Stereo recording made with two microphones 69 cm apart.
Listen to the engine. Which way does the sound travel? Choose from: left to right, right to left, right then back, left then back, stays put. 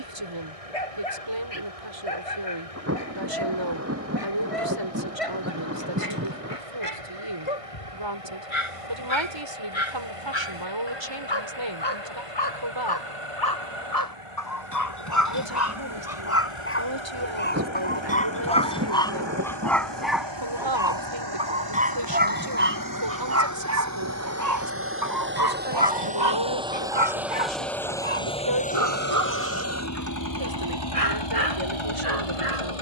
right to left.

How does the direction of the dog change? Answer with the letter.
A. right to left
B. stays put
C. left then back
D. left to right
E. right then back
D.